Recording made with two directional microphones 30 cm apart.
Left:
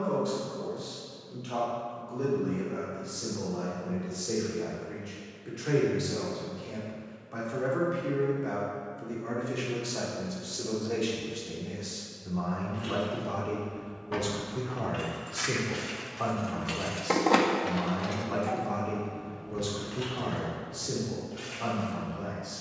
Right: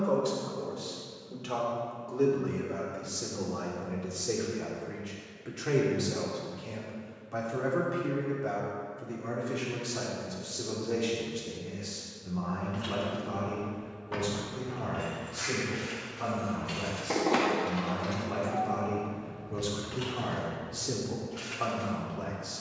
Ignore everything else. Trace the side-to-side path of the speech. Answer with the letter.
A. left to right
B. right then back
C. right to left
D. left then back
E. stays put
D.